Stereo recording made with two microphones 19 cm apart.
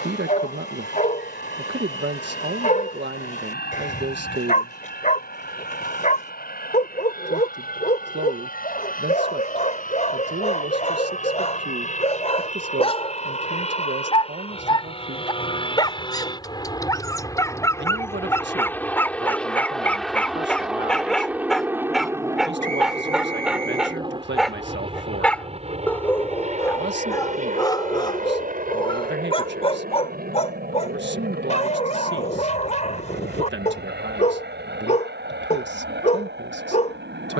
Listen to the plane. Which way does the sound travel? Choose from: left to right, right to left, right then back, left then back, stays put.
left to right.